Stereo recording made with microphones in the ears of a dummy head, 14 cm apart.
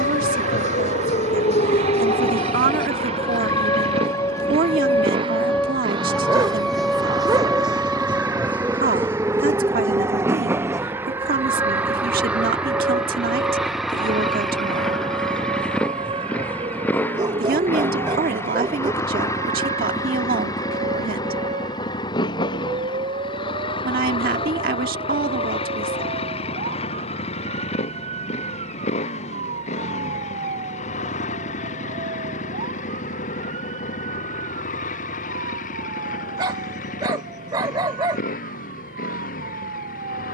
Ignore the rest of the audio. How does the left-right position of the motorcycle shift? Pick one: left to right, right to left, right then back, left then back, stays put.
right to left.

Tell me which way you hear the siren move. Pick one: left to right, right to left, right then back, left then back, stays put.
left to right.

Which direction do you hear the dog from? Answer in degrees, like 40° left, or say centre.
30° right.